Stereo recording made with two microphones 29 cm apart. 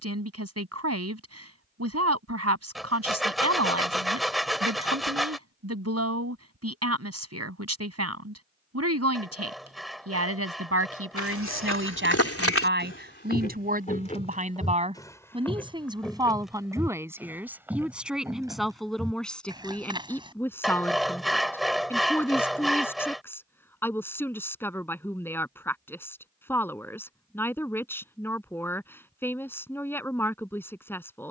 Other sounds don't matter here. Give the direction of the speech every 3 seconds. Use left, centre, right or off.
right, right, right, right, right, centre, centre, centre, centre, centre, centre.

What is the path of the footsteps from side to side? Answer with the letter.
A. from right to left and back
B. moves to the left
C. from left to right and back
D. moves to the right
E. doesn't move
D.